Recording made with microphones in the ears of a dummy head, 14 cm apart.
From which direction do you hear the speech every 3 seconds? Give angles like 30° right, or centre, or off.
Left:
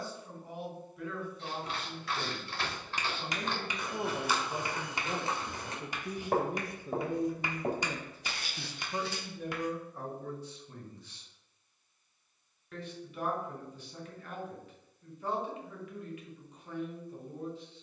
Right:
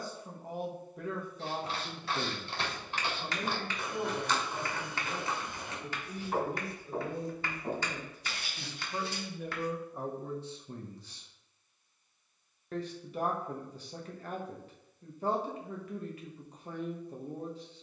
30° right, 20° left, 40° left, 20° right, 30° right, 30° right.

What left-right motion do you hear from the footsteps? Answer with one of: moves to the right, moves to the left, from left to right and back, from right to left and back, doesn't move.
moves to the left.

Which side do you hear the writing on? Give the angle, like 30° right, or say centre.
20° left.